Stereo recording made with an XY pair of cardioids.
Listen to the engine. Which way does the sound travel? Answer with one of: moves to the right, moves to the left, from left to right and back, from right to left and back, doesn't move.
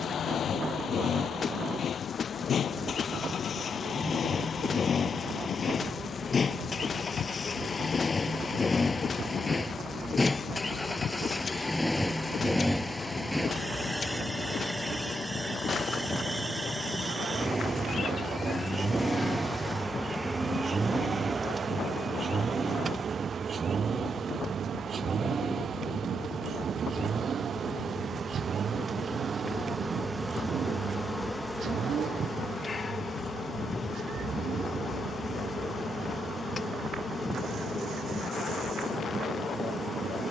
moves to the right.